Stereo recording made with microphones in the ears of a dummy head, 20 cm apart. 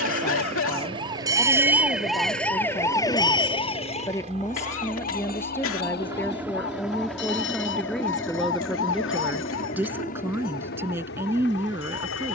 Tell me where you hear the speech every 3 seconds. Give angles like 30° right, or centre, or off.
20° left, 10° left, centre, 10° right.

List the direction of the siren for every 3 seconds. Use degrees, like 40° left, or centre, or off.
10° right, 30° left, 50° left, 60° left.